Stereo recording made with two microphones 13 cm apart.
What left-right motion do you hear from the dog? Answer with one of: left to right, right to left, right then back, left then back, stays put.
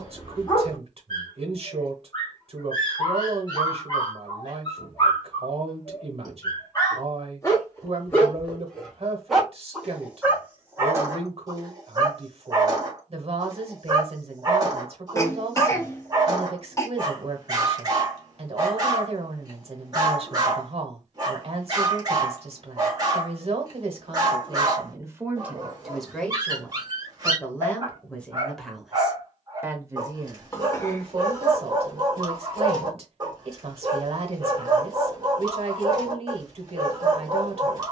left to right.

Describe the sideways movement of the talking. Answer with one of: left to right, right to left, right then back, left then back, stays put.
left then back.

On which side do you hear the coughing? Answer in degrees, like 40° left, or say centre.
20° left.